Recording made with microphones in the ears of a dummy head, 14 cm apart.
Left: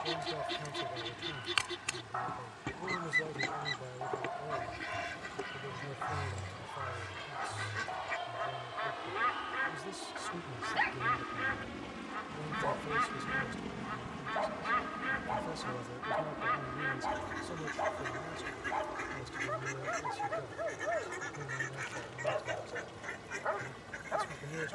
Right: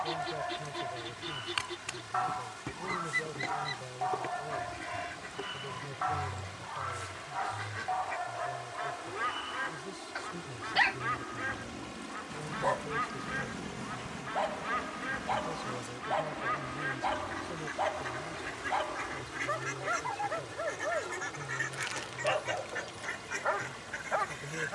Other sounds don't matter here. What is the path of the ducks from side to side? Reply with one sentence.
You can hear the ducks go from the left side to the right.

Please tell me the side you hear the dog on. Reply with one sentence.
In this clip you hear the dog on the right.